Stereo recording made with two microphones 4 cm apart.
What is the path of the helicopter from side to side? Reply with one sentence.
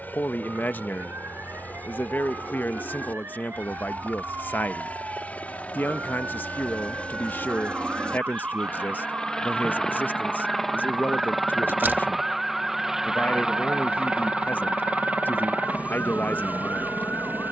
You can hear the helicopter go from the left side to the right.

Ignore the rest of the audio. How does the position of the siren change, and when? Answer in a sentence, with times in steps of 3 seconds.
You can hear the siren on the right from 0 s, in the centre from 12 s and on the left from 15 s.